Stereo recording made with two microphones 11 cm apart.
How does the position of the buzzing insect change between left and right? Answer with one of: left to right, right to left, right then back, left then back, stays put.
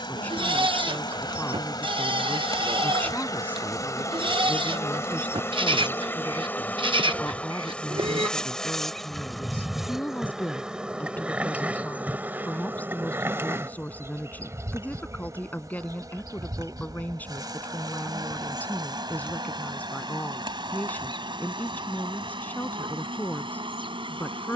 left to right.